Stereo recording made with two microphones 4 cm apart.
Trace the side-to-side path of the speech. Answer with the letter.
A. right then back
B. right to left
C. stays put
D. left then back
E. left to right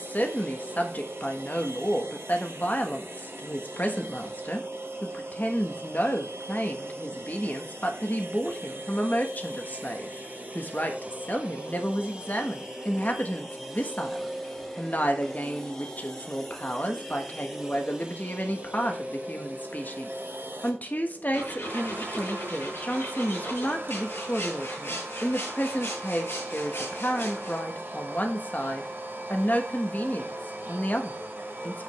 C.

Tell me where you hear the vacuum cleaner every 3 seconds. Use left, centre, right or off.
right, right, right, right, centre, centre, right, right, right, right, right.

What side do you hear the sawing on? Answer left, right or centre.
left.